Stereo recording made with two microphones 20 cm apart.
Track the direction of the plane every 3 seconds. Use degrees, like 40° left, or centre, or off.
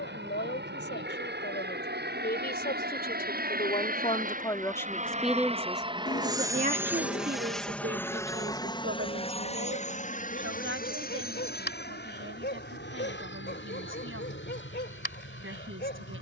70° right, 40° right, centre, 40° left, 60° left, 60° left.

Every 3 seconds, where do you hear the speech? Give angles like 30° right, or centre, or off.
60° left, 20° left, 50° right, 80° right, 80° right, 80° right.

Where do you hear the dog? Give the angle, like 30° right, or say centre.
60° left.